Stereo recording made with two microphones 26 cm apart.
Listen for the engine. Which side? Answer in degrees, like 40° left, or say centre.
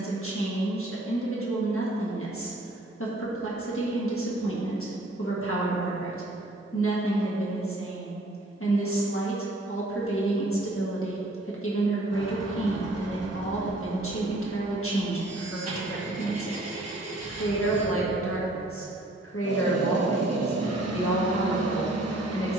70° right.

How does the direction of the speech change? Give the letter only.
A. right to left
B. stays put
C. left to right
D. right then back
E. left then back
B.